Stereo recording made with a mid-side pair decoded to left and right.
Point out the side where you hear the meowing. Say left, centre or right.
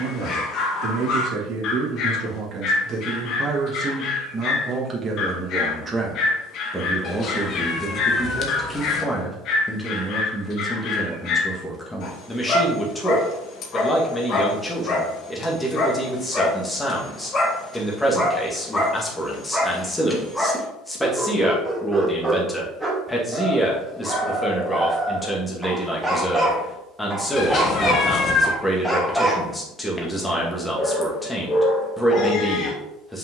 left.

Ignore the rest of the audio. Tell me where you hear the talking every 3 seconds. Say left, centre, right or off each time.
right, right, centre, centre, centre, centre, centre, centre, centre, centre, centre.